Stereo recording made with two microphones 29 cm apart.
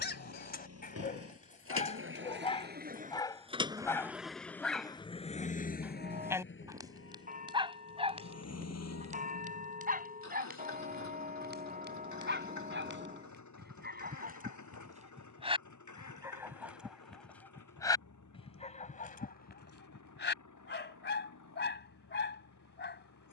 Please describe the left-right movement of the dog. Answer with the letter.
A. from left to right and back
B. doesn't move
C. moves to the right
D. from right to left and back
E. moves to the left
A.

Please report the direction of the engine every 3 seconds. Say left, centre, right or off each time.
right, centre, left, left, left, left, left, left.